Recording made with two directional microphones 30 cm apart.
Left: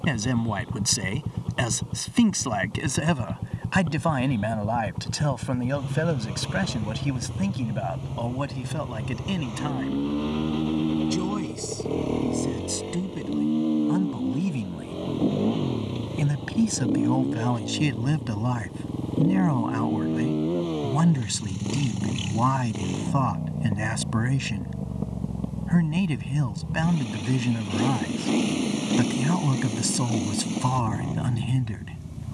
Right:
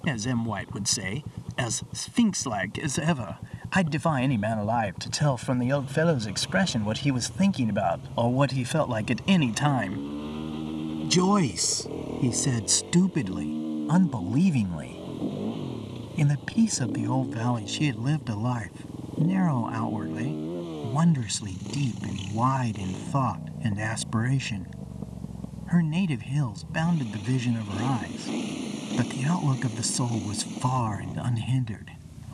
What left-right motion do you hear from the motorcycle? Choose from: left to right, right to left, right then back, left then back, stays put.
stays put.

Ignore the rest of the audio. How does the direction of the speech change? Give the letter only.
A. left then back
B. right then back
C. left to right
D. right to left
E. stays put
B.